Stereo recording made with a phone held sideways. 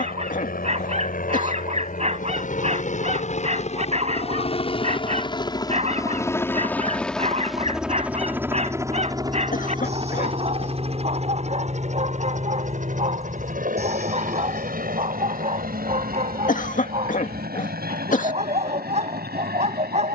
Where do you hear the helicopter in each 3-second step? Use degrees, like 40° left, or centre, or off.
60° left, 40° left, centre, 30° right, 50° right, 60° right, 70° right.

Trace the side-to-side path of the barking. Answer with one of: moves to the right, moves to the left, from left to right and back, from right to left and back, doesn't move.
doesn't move.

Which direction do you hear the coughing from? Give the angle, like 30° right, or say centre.
50° left.